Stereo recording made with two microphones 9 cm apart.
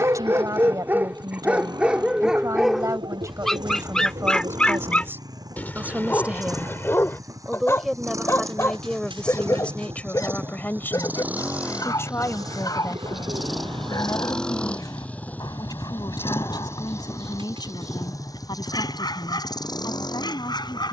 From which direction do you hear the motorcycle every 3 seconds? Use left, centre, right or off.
right, right, right, right, centre, left, left.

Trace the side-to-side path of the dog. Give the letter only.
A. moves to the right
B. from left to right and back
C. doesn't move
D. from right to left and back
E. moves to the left
E.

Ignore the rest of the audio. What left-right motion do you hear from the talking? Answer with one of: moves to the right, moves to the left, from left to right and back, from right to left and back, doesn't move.
moves to the left.